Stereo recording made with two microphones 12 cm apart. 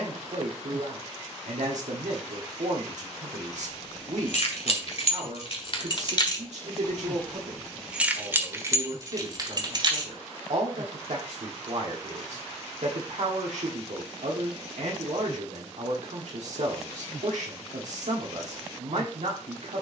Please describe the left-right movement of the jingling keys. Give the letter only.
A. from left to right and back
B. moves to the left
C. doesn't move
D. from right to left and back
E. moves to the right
E.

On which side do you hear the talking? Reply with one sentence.
You can hear the talking on the right.